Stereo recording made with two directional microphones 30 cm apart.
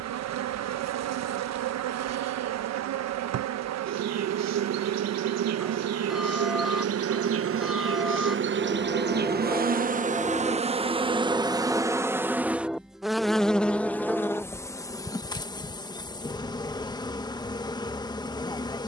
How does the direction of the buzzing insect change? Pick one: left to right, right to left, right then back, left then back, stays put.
right to left.